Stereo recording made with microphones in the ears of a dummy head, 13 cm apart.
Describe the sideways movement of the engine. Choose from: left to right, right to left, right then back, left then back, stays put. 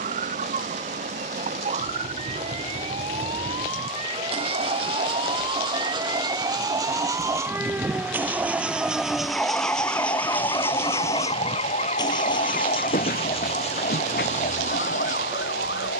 right to left.